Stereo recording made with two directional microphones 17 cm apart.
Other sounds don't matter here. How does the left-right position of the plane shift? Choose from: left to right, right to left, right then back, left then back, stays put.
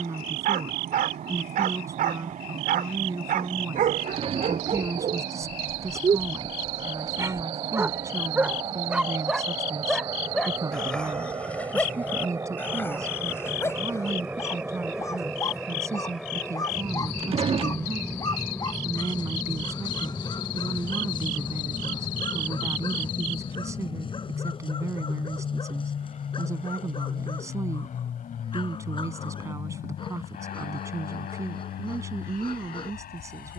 right to left.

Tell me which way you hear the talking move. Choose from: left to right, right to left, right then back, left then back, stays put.
stays put.